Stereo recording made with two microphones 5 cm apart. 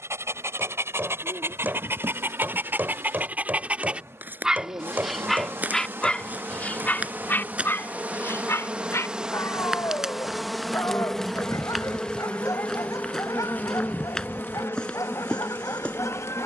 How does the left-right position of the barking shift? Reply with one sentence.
You can hear the barking move from right to left.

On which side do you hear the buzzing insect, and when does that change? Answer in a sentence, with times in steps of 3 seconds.
You can hear the buzzing insect on the right from 0 s, in the centre from 9 s and on the left from 12 s.